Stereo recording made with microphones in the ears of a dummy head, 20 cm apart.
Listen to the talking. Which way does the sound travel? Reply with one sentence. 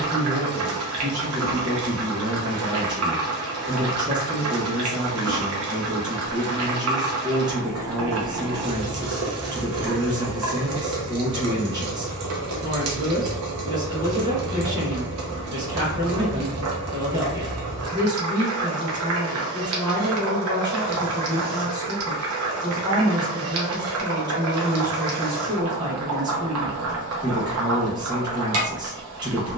You can hear the talking stay in one place.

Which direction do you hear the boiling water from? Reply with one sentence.
You can hear the boiling water on the right.